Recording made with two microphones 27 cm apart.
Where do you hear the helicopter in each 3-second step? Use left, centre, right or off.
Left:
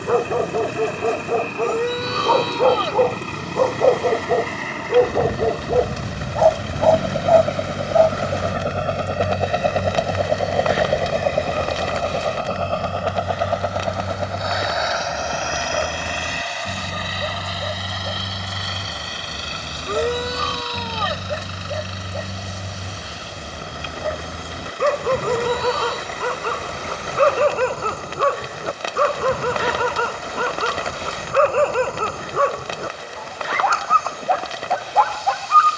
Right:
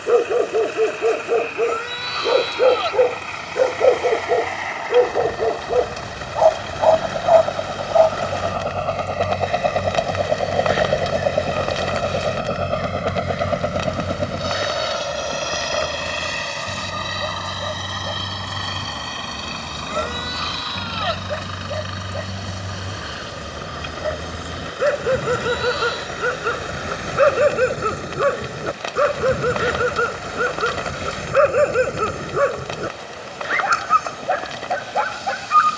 left, left, left, centre, right, right, right, right, right, right, right, right.